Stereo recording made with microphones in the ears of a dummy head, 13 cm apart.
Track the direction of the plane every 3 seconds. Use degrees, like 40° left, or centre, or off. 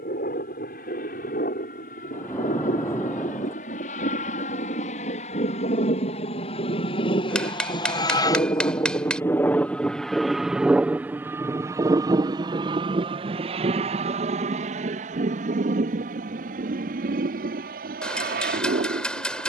70° left, 60° left, 40° left, centre, 40° right, 60° right, 60° right.